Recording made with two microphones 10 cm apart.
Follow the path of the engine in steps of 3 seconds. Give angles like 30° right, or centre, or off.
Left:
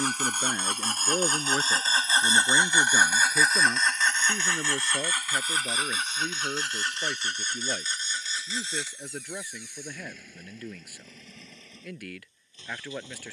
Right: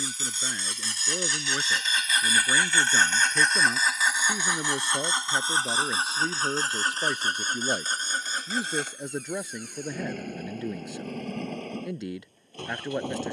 40° left, 10° right, 40° right, 60° right, 60° right.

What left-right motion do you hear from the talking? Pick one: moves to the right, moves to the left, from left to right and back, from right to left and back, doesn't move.
moves to the right.